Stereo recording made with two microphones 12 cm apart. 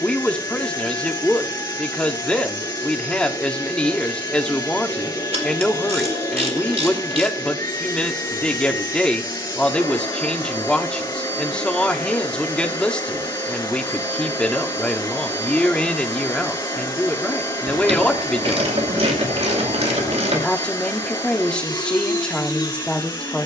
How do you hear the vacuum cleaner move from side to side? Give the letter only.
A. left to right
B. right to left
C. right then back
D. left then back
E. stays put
E.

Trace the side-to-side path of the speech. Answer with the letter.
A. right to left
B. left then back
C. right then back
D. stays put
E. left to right
D.